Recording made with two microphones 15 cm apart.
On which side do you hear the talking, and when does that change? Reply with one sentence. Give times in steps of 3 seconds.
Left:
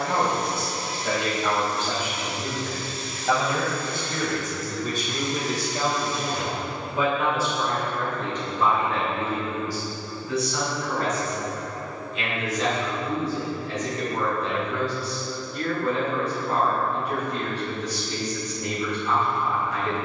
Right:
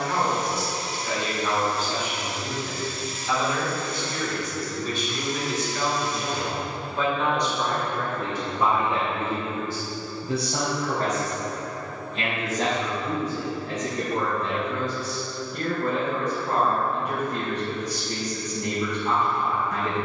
In this clip you hear the talking on the left from 0 s, in the centre from 6 s and on the right from 9 s.